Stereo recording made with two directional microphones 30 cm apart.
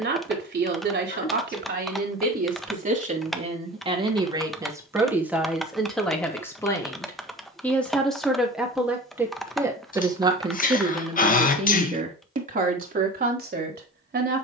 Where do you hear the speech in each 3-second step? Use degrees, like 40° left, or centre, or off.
30° right, 10° right, centre, 20° right, 30° right.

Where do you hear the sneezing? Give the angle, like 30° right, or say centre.
30° left.